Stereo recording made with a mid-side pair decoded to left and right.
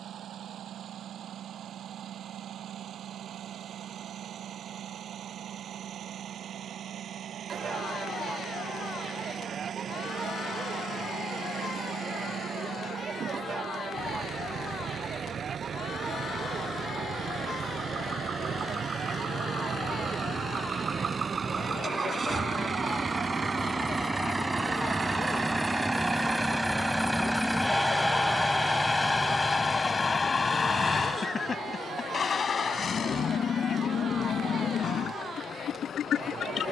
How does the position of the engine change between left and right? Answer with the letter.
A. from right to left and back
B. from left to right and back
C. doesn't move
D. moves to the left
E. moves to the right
D.